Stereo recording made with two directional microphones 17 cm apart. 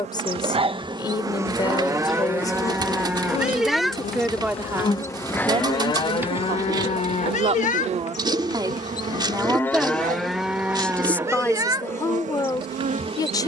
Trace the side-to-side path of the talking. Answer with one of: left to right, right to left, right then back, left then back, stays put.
right then back.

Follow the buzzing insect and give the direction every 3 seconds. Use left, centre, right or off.
centre, left, right, right, right.